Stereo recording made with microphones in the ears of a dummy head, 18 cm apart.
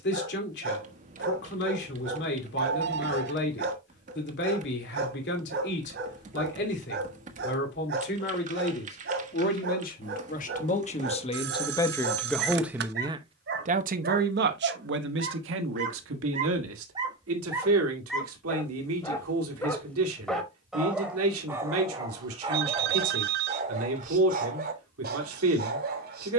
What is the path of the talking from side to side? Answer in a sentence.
You can hear the talking travel towards the right.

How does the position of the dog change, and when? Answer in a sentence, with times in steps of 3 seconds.
In this clip you hear the dog on the right from 0 s, in the centre from 18 s and on the right from 21 s.